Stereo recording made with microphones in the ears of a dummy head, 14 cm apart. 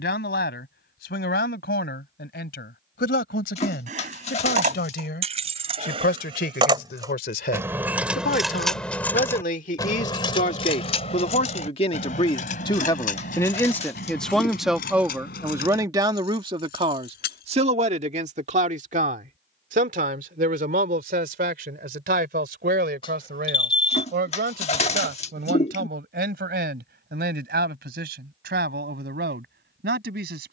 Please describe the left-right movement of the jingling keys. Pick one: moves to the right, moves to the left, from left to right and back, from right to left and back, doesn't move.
moves to the left.